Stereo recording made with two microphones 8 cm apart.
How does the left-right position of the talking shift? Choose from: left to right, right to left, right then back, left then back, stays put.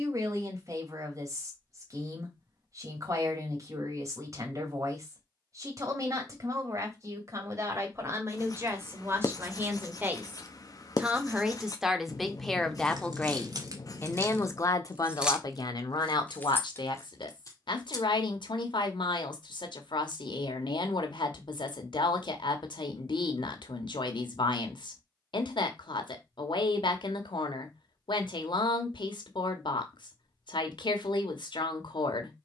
right to left.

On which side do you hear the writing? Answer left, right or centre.
left.